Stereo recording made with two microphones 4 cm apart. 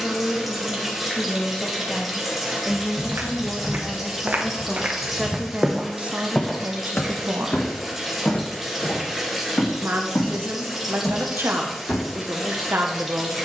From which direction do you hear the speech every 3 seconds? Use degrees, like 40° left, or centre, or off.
20° left, centre, 50° right, 70° right, 70° right.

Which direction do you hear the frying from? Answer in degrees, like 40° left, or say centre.
10° right.